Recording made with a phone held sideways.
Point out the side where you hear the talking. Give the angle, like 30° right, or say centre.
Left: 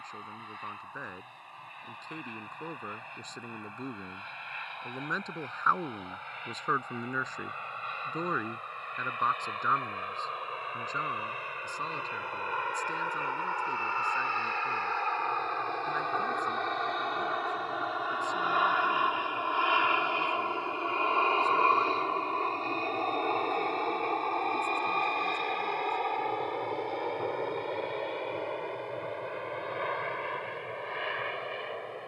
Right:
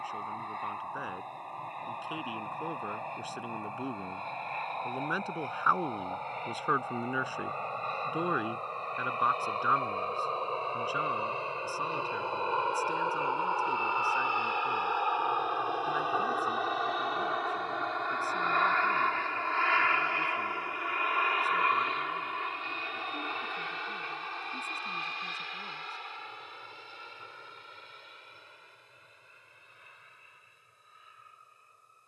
10° right.